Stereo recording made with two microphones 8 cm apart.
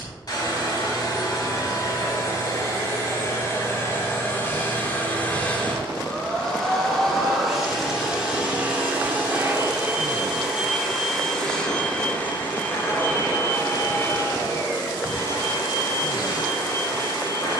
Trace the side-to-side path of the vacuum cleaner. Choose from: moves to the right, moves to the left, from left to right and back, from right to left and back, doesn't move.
from left to right and back.